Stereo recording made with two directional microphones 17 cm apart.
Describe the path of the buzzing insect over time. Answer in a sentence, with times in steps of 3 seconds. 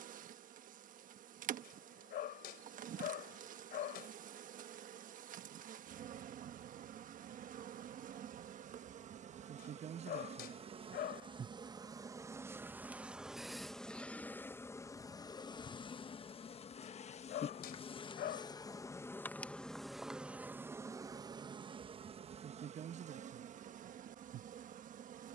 You can hear the buzzing insect on the right from 0 s, in the centre from 12 s, on the left from 15 s, in the centre from 18 s and on the right from 21 s.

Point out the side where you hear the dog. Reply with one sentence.
You can hear the dog on the left.